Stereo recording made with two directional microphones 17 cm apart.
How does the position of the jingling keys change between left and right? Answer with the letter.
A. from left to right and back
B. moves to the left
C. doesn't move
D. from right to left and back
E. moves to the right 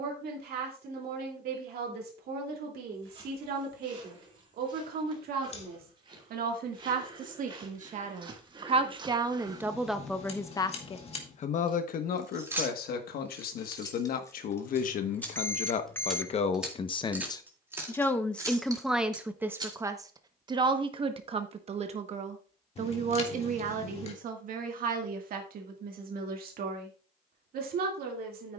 D.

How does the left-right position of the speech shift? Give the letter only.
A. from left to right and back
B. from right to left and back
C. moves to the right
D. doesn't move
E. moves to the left
B.